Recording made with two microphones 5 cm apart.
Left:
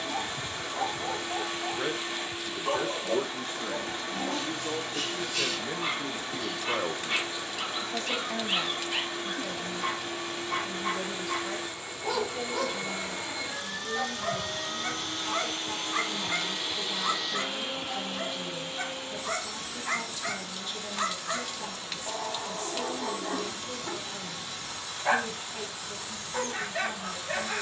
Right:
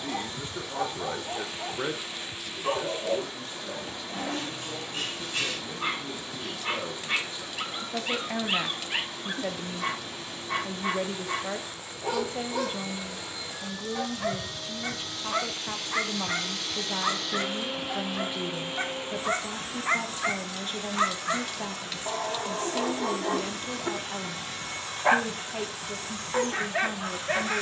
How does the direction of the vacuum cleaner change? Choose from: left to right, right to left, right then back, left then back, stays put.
left to right.